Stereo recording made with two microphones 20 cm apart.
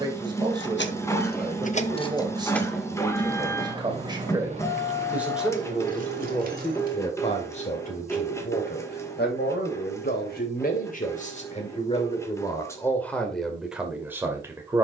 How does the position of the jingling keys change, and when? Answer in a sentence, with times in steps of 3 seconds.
You can hear the jingling keys on the left from 0 s, on the right from 3 s and not at all from 9 s.